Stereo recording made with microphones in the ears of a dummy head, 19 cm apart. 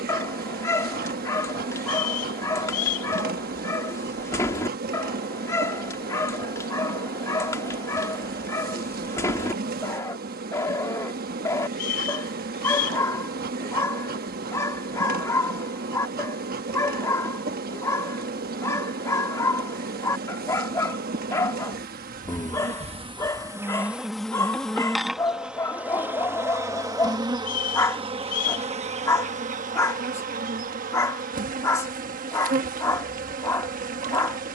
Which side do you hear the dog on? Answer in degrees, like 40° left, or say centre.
10° left.